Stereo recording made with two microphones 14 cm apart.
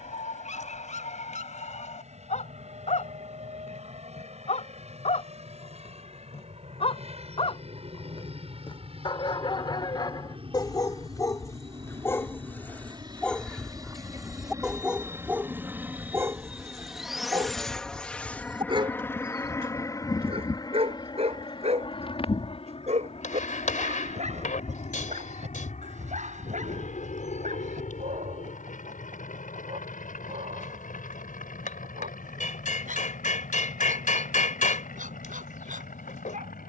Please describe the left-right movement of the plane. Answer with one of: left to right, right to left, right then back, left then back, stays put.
right to left.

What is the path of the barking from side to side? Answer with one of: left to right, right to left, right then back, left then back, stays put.
left to right.